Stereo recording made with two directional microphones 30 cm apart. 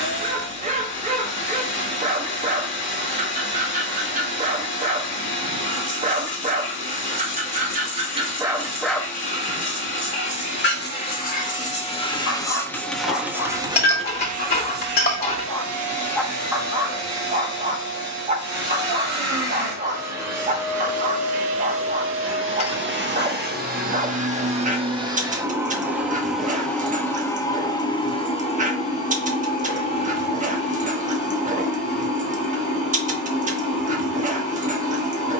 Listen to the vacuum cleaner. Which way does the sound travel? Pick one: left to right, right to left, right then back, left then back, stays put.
right then back.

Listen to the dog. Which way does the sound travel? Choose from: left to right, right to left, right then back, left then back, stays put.
left then back.